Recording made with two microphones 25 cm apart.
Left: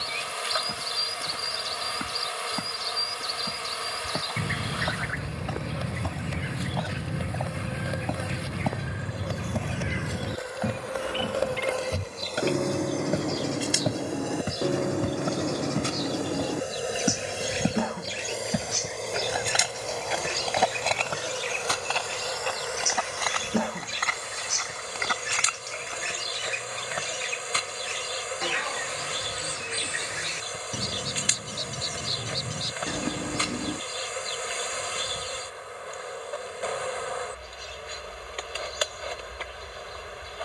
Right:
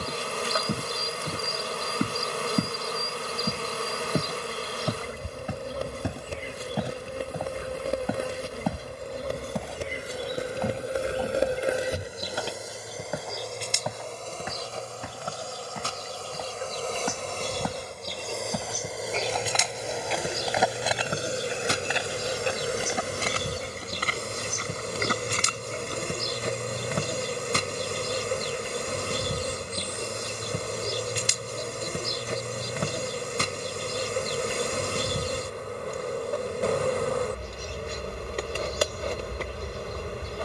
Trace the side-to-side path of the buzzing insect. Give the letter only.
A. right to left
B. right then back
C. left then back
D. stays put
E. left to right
C.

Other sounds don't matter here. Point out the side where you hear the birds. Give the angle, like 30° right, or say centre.
80° left.